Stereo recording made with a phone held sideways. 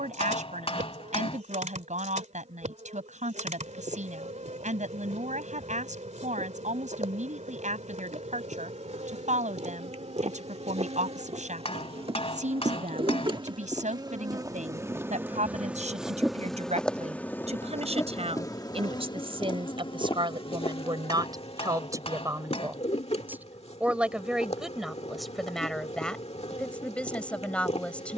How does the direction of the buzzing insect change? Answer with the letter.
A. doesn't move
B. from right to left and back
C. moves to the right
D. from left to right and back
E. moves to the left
E.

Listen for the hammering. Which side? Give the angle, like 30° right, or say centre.
50° left.